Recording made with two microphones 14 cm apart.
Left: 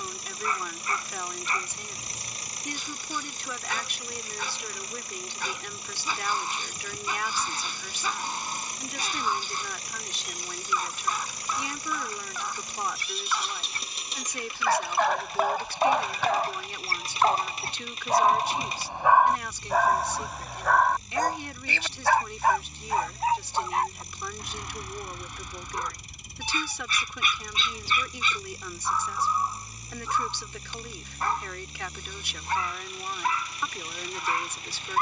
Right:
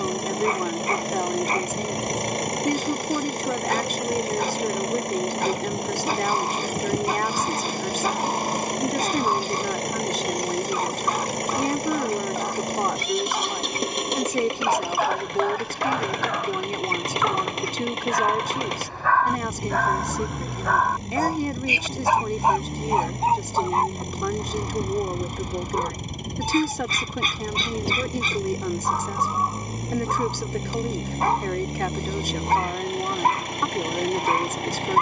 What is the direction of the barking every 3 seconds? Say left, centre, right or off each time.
right, right, right, right, right, left, centre, right, right, right, right, right.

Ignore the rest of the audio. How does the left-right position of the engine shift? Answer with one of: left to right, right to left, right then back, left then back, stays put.
stays put.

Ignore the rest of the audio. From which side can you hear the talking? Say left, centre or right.
right.